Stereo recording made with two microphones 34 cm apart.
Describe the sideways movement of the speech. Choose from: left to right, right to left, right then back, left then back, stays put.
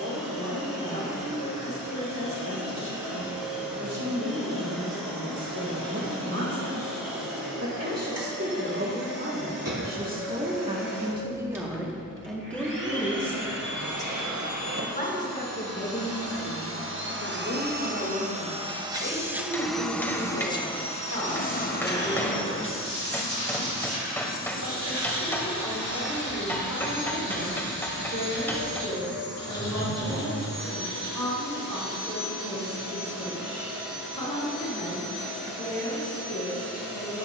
right to left.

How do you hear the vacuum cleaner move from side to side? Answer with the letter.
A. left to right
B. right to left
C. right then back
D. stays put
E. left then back
B.